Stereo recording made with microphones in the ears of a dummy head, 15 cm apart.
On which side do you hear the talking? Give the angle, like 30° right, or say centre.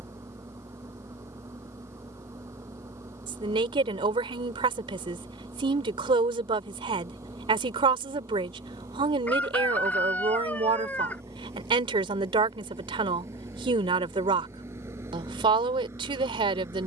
30° right.